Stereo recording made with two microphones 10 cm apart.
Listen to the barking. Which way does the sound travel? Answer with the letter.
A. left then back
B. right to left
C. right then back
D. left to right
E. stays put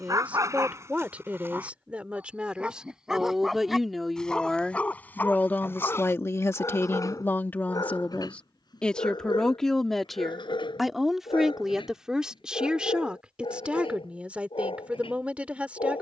B.